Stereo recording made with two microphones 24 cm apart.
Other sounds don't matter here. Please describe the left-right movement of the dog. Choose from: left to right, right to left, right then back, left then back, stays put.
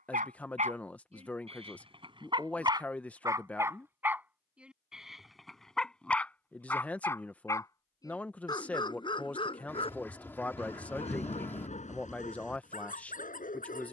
right to left.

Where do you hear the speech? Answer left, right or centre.
centre.